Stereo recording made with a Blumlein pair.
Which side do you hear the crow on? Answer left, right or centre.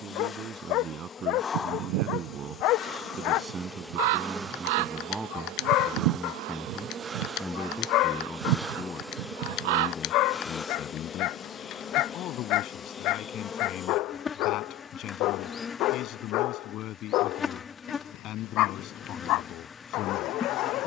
right.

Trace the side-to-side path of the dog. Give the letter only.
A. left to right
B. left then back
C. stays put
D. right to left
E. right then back
C.